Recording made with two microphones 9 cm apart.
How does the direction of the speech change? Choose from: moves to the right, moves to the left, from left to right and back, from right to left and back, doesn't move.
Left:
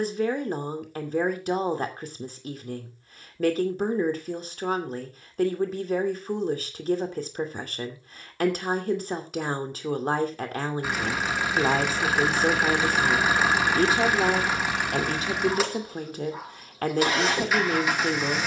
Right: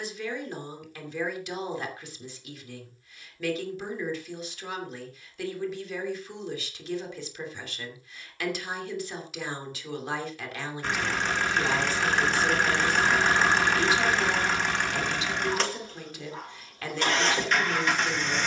doesn't move.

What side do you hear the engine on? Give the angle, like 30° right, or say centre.
10° left.